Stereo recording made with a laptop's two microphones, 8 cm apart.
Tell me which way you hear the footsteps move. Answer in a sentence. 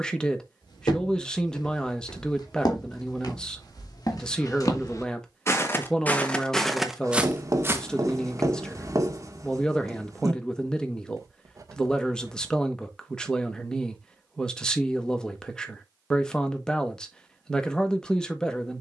You can hear the footsteps go from the left side to the right.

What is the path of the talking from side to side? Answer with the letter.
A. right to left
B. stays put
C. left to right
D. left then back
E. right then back
B.